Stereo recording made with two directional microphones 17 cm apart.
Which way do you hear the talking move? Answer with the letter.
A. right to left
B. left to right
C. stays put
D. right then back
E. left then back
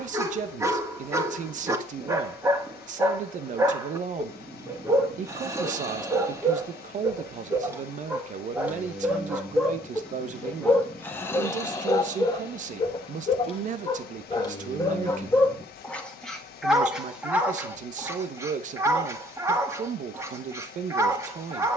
C.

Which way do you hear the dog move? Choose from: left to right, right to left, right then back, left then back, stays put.
left then back.